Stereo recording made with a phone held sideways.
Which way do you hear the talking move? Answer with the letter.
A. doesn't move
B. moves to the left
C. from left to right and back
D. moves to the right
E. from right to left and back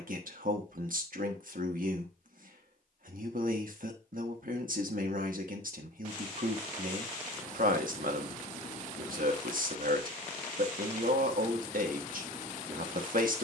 A.